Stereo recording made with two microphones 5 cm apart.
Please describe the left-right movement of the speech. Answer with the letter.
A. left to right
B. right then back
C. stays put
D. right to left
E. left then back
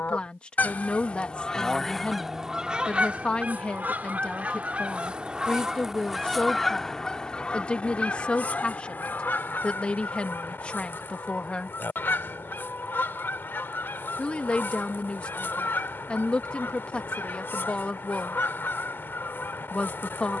C.